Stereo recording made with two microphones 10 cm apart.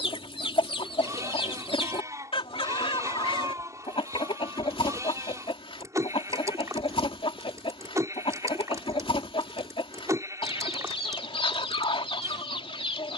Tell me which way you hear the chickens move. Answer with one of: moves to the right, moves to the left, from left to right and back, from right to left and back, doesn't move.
doesn't move.